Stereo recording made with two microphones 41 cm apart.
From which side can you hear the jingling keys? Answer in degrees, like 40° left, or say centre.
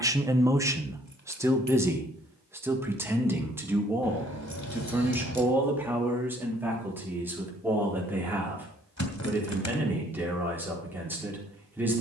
40° left.